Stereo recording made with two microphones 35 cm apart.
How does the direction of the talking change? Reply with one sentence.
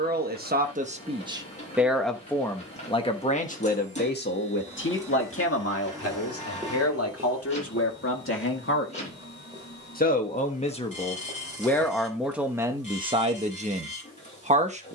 You can hear the talking go left and come back.